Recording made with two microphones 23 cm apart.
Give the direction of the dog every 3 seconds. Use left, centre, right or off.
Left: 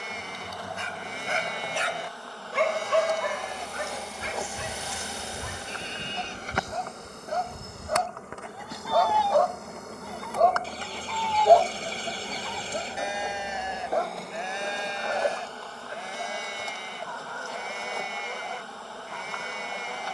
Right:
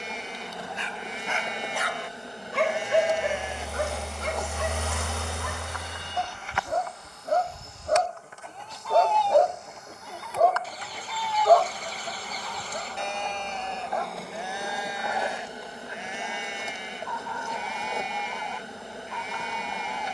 left, right, right, centre, left, left, left.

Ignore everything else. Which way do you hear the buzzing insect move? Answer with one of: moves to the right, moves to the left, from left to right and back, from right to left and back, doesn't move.
from right to left and back.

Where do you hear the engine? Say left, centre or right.
right.